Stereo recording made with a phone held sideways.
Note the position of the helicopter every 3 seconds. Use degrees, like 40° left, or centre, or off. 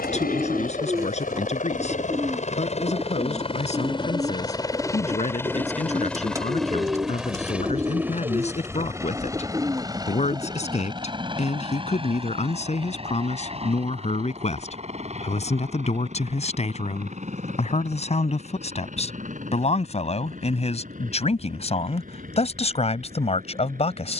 50° left, 20° left, 10° right, 20° right, 30° right, 40° right, 50° right, 50° right.